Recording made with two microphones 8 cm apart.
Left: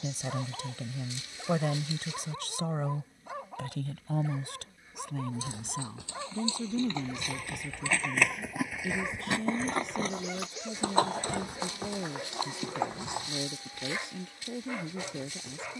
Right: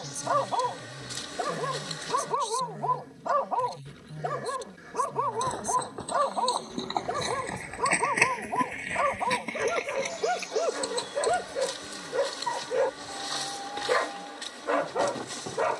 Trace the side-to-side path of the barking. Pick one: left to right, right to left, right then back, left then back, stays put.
stays put.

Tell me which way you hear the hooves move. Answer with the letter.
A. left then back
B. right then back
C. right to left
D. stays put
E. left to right
C.